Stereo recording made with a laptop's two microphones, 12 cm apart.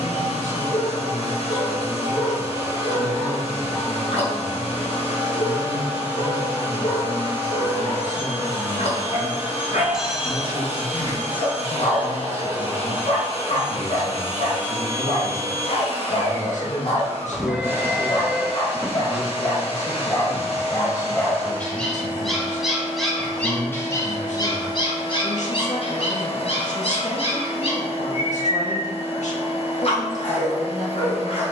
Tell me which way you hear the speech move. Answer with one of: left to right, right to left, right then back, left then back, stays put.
stays put.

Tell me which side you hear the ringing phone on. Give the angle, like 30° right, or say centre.
10° right.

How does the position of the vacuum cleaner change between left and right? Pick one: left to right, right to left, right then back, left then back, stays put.
stays put.